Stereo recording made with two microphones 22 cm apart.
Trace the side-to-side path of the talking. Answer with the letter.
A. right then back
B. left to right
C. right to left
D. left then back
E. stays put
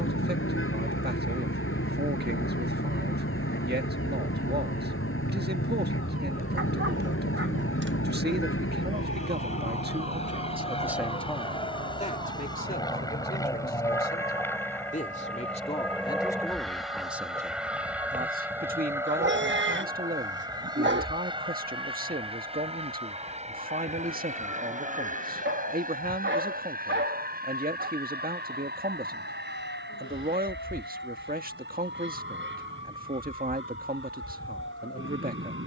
D.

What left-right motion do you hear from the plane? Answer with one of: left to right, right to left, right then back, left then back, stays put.
left to right.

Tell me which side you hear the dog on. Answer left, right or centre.
right.